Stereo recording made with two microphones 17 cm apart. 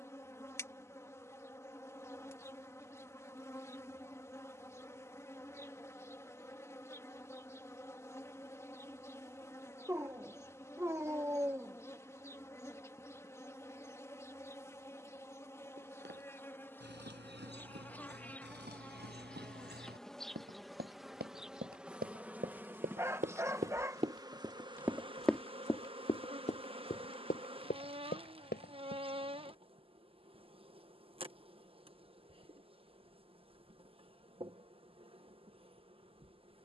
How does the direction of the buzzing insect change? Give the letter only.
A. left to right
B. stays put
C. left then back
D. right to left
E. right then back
A.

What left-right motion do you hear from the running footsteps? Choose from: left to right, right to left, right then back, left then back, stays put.
right to left.